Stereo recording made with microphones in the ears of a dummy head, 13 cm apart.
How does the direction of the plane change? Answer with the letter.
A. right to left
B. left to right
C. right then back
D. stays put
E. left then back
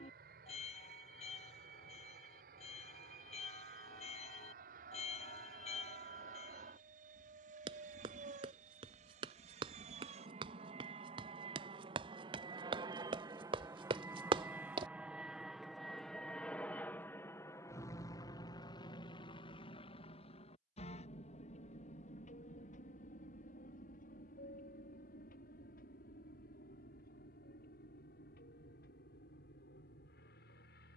A.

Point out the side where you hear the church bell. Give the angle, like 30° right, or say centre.
40° left.